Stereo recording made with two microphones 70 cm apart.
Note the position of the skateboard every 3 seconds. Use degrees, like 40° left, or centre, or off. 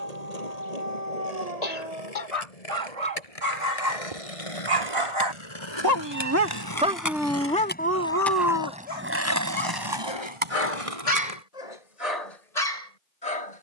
60° left, 50° left, 20° left, 40° right, off.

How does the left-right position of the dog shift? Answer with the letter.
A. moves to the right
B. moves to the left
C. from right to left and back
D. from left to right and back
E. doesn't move
B.